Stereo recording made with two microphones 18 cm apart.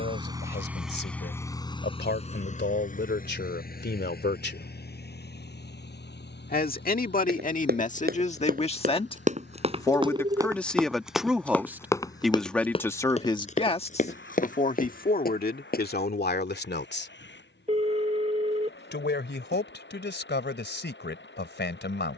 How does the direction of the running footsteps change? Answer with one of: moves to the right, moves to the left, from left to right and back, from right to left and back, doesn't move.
moves to the left.